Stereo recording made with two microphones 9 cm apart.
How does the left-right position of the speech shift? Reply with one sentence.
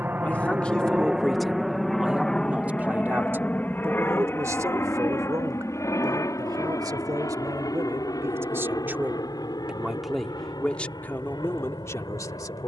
You can hear the speech move from left to right and back again.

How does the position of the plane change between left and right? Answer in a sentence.
In this clip you hear the plane travel towards the left.